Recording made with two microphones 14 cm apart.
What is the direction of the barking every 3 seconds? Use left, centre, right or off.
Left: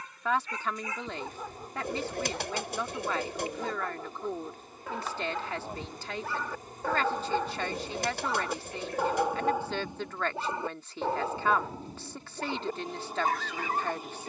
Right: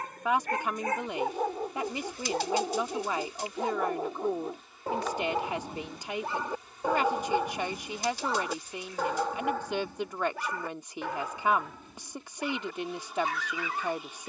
right, right, centre, left, left.